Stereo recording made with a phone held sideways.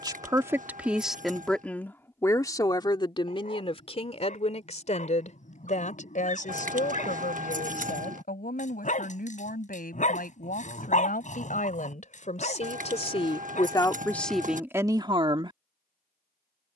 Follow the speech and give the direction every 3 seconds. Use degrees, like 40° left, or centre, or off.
centre, 40° left, 60° left, 60° left, 20° left, 30° right.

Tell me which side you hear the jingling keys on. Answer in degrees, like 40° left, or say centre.
50° right.